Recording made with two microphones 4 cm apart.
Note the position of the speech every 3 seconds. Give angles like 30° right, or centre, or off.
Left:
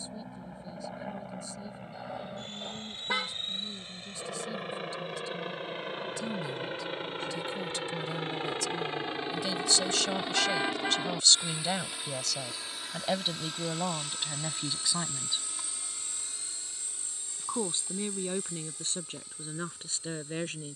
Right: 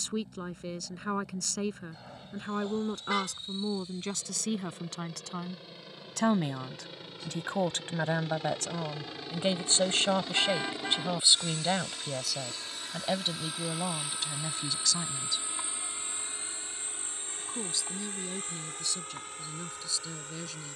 80° right, 70° right, 50° right, 20° right, 10° left, 30° left, 40° left.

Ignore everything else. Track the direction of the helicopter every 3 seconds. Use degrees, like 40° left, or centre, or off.
60° left, 50° left, 40° left, 20° left, centre, 30° right, 50° right.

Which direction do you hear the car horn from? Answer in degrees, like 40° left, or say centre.
20° left.